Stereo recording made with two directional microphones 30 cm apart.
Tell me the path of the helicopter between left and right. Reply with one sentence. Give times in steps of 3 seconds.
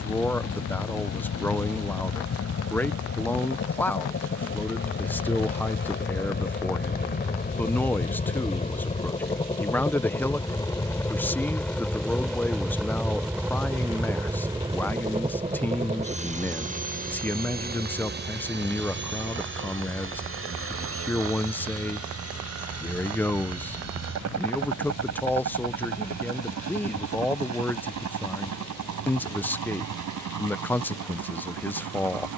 In this clip you hear the helicopter on the left from 0 s, in the centre from 9 s and on the right from 15 s.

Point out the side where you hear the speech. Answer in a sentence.
You can hear the speech in the centre.